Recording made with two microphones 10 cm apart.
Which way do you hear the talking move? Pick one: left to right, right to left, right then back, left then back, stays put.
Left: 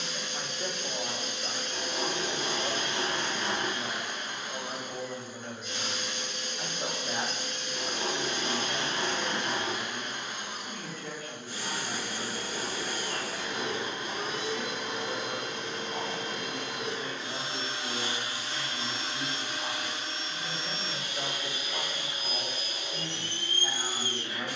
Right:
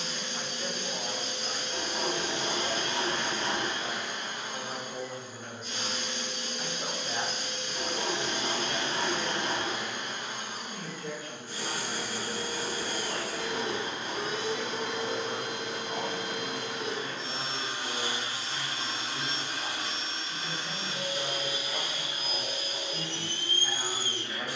right then back.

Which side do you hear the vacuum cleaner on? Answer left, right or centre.
right.